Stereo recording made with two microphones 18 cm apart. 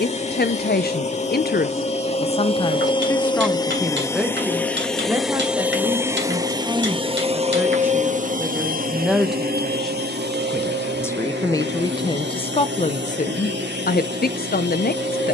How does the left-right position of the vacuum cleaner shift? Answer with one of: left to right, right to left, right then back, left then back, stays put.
left to right.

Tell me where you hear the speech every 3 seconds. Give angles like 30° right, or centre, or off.
50° left, centre, 10° right, 10° left, 40° left.